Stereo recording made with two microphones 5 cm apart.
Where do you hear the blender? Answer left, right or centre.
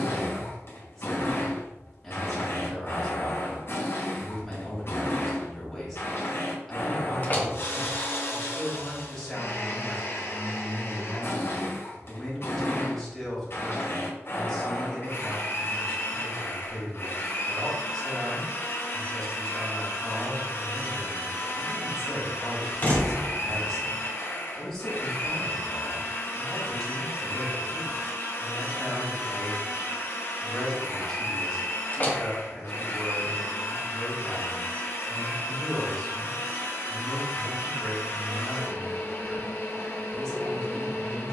left.